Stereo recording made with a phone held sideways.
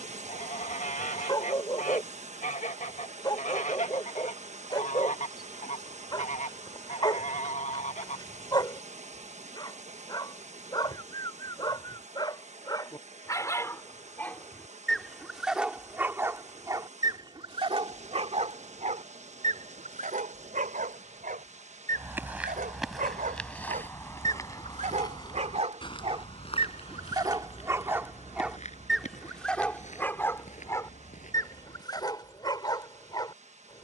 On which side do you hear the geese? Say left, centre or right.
left.